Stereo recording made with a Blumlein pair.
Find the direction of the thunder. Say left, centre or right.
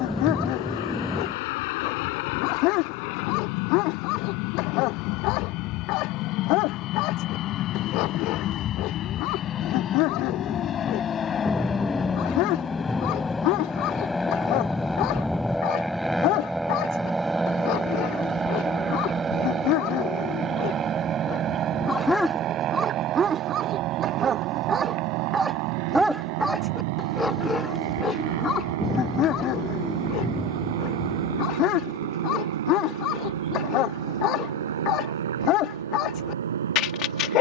centre.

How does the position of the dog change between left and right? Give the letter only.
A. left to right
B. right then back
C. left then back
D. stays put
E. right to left
B.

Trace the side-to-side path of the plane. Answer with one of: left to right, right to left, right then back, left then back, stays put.
left to right.